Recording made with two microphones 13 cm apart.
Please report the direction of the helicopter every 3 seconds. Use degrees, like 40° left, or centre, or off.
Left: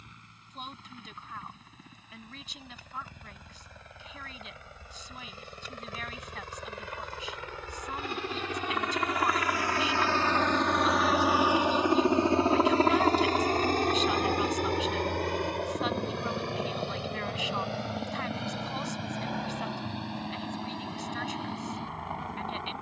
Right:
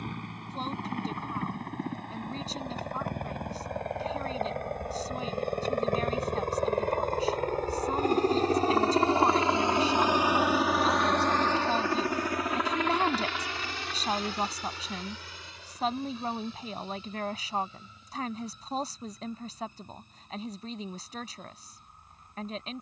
70° right, 60° right, 50° right, 10° right, 40° left, 60° left, 70° left, 80° left.